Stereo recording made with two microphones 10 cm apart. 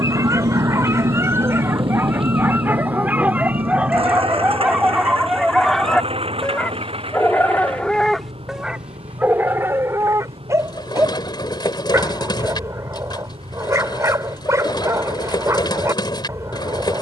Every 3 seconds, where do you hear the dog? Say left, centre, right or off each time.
right, centre, centre, right, right, right.